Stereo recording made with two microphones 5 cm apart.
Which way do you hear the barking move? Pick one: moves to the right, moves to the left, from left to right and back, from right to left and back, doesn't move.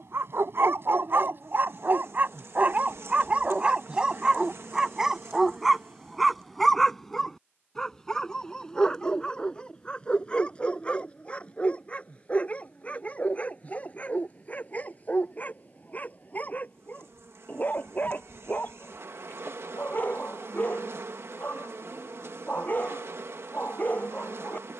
moves to the left.